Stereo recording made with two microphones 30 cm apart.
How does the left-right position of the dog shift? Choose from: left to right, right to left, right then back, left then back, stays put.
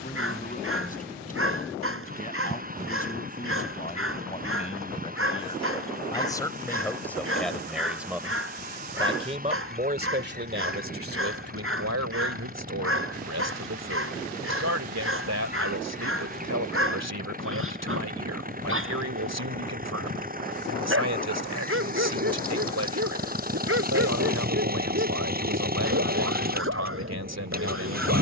stays put.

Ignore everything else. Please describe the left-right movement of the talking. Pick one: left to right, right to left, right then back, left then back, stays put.
left to right.